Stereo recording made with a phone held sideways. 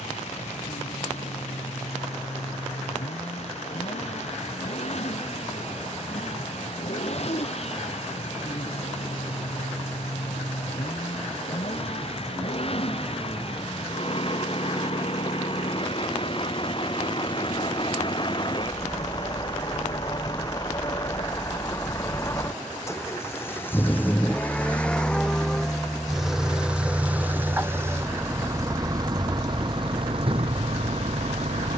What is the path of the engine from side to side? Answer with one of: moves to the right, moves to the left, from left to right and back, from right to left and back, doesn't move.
moves to the right.